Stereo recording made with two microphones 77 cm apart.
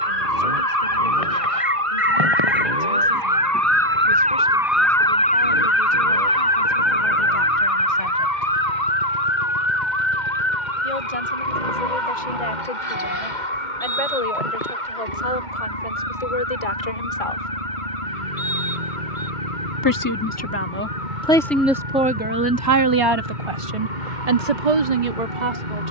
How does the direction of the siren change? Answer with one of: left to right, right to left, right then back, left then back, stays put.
right to left.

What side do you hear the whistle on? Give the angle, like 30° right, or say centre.
centre.